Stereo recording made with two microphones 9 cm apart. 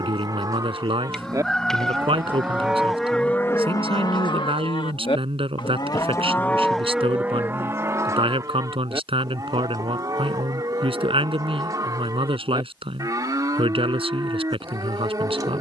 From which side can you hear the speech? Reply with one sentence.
You can hear the speech on the right.